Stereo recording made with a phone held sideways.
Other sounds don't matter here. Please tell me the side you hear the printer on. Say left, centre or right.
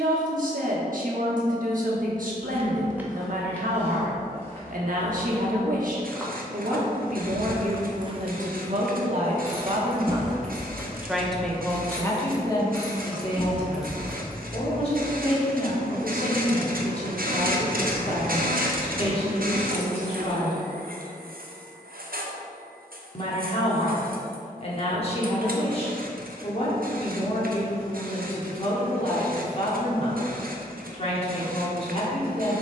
right.